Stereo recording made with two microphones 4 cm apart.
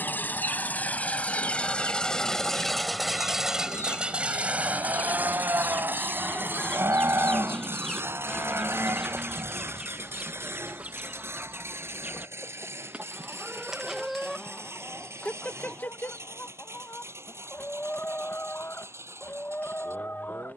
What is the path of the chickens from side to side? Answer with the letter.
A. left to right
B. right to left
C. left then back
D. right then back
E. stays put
D.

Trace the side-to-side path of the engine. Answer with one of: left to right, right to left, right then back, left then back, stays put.
left to right.